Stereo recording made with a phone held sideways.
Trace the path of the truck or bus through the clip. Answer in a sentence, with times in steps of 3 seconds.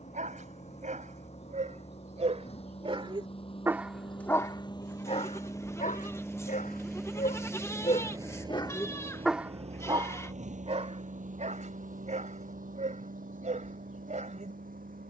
You can hear the truck or bus on the left from 0 s, in the centre from 6 s and on the right from 9 s.